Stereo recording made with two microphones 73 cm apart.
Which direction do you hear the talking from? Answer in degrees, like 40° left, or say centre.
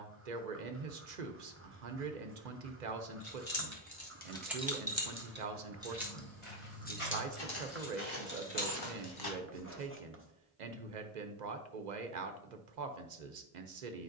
70° right.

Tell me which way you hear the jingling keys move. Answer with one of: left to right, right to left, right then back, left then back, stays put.
right then back.